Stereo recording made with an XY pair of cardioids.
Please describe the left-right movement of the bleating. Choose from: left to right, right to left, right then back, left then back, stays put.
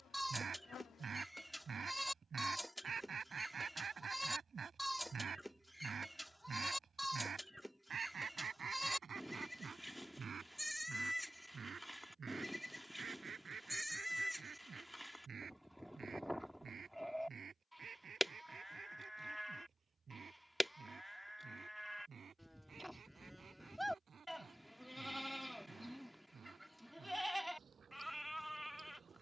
stays put.